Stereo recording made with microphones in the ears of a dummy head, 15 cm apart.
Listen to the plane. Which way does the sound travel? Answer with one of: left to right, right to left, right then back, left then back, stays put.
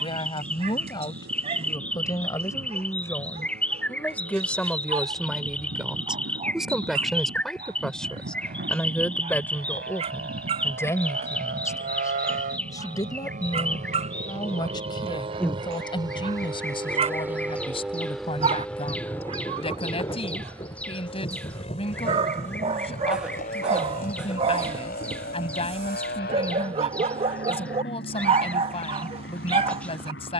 right to left.